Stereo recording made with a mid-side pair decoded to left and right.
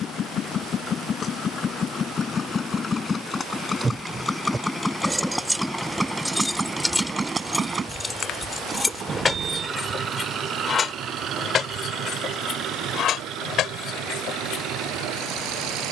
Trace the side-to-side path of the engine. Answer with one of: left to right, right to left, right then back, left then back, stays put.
left to right.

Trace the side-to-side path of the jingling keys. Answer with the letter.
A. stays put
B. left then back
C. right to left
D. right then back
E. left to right
C.